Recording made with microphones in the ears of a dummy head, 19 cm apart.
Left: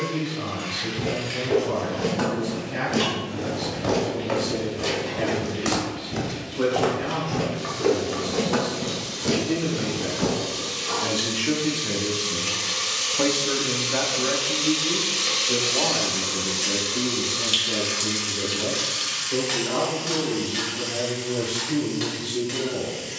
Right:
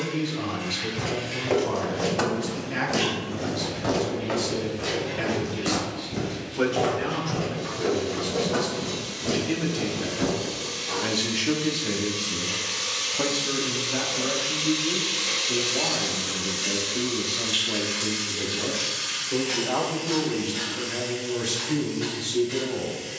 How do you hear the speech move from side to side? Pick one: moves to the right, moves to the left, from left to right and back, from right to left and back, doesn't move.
from right to left and back.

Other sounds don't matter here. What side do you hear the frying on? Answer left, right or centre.
left.